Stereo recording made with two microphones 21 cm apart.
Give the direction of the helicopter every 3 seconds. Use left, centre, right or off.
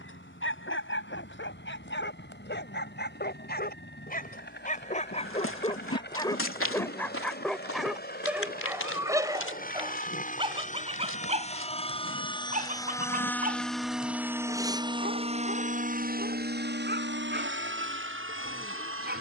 left, left, left, left, centre, right, right.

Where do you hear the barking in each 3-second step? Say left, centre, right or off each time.
left, left, centre, right, right, right, right.